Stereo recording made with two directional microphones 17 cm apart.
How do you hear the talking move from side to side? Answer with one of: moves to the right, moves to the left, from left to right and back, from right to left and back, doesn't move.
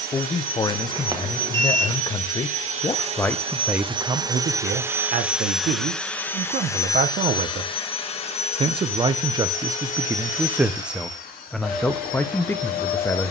from left to right and back.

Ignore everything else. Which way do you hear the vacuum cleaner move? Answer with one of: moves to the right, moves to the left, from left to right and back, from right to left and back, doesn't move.
moves to the left.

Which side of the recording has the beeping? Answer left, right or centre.
right.